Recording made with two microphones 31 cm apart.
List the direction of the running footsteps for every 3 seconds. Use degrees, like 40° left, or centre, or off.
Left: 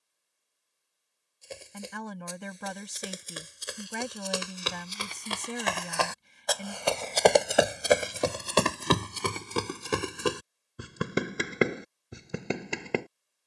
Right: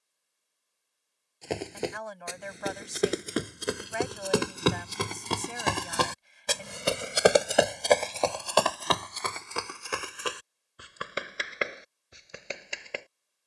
80° right, 70° right, centre, 50° left, 60° left.